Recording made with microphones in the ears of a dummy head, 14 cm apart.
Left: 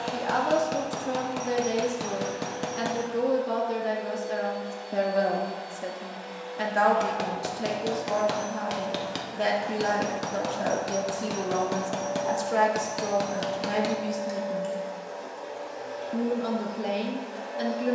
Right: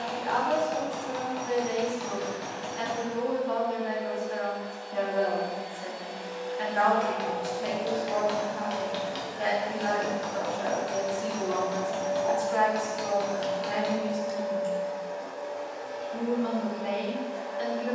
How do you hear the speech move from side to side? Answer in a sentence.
You can hear the speech stay in one place.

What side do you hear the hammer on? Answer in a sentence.
You can hear the hammer on the left.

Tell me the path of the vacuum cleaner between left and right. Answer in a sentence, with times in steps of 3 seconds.
In this clip you hear the vacuum cleaner on the left from 0 s, on the right from 6 s, in the centre from 12 s and on the left from 15 s.